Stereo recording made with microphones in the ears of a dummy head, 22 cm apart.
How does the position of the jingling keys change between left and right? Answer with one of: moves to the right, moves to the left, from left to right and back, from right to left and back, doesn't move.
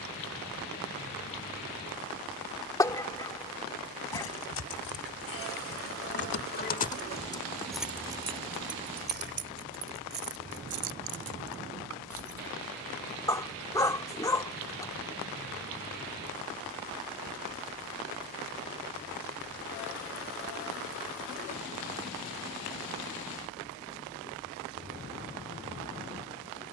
moves to the right.